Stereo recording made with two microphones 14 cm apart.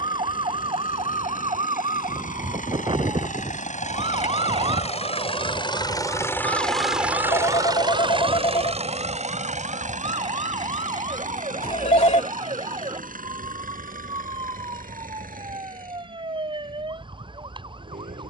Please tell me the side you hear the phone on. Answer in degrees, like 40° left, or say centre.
50° left.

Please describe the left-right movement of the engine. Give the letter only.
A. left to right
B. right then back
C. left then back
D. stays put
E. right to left
A.